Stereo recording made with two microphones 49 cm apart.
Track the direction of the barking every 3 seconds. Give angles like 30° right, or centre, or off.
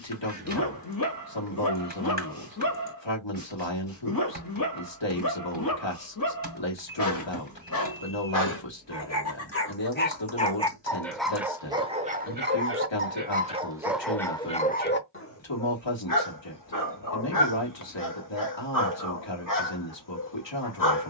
40° left, 40° left, 40° left, 10° left, 10° right, 40° left, 40° left.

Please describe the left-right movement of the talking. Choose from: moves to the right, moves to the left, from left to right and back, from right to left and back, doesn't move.
doesn't move.